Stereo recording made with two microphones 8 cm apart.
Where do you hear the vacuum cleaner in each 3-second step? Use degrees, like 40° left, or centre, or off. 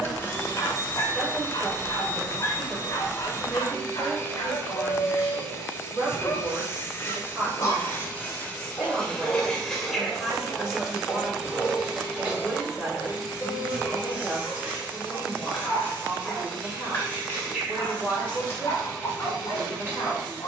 30° left, 30° left, 30° left, centre, 20° right, 30° right, 30° right.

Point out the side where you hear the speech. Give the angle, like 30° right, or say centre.
10° right.